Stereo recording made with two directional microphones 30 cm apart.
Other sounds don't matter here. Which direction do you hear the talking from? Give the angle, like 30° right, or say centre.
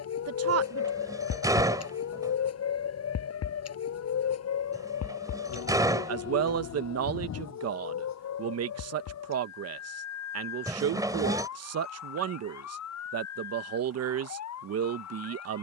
50° right.